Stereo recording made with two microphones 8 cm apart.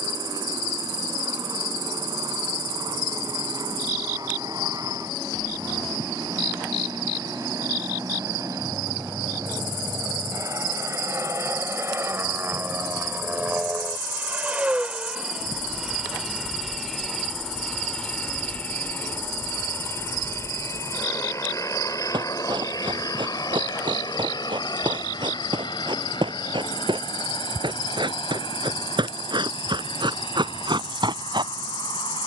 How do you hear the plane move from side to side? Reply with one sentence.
You can hear the plane move to the left.